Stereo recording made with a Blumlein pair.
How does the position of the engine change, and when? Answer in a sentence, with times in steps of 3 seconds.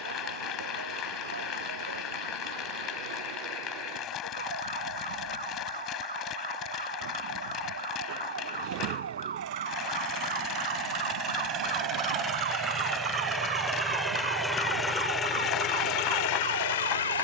You can hear the engine on the right from 0 s, in the centre from 12 s and on the left from 15 s.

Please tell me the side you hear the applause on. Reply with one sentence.
You can hear the applause on the left.